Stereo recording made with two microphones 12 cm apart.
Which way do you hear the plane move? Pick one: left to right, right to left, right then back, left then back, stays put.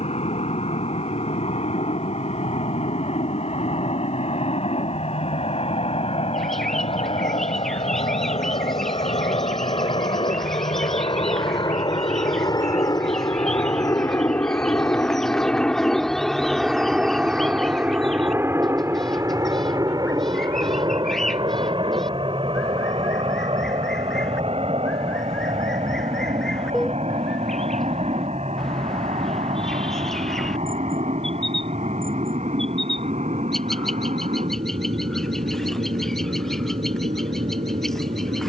left to right.